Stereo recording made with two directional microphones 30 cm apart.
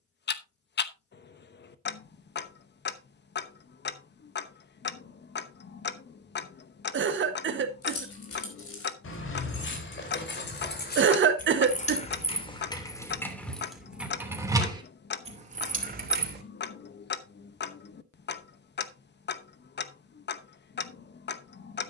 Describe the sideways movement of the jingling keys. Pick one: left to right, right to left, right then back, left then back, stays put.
left to right.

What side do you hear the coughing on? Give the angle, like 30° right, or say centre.
40° right.